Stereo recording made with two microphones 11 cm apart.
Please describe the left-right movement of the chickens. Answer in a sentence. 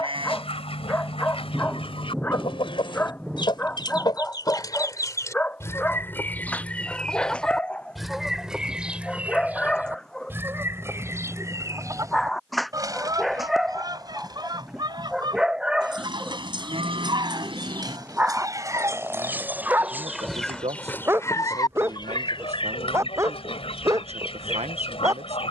In this clip you hear the chickens go right and come back.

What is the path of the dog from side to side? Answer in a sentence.
In this clip you hear the dog go from the left side to the right.